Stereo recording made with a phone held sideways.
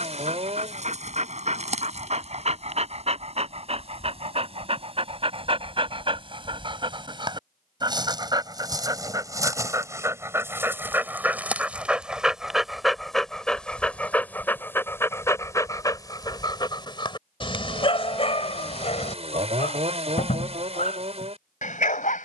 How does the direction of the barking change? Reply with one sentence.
In this clip you hear the barking travel towards the left.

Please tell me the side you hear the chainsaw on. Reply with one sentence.
In this clip you hear the chainsaw on the right.